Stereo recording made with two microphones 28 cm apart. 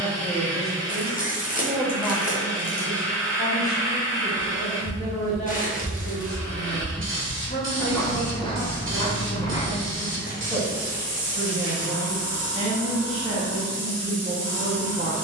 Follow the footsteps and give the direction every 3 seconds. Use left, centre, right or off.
off, centre, centre, left, off.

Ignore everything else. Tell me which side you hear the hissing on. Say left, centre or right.
right.